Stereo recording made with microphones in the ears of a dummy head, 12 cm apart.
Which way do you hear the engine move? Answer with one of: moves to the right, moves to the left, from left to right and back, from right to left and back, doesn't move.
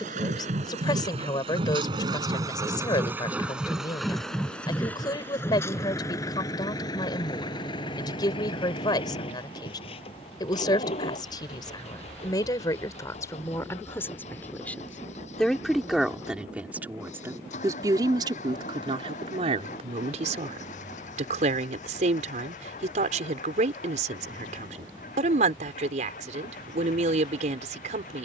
moves to the left.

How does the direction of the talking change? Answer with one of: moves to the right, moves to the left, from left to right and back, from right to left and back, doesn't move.
moves to the right.